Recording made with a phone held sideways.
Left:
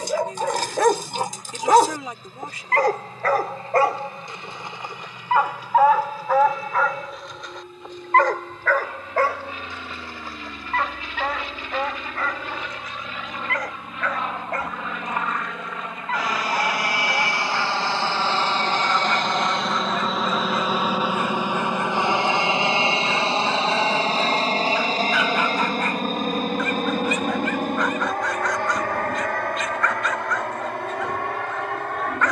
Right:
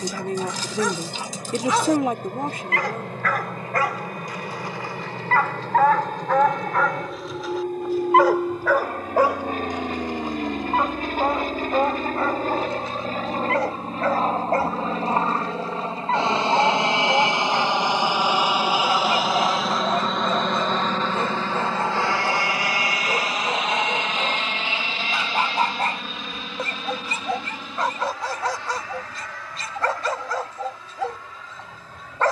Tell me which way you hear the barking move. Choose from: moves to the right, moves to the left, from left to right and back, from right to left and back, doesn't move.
moves to the right.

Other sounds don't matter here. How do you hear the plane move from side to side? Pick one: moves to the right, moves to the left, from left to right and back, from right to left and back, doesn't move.
moves to the left.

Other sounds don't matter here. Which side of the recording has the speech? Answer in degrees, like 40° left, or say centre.
50° right.